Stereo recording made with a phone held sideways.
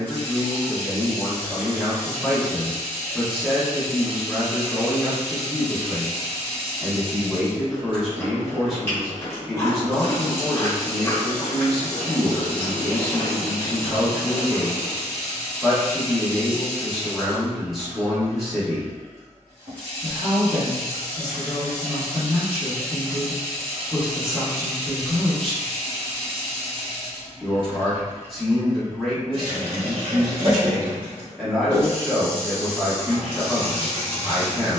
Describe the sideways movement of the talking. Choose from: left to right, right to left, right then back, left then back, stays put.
stays put.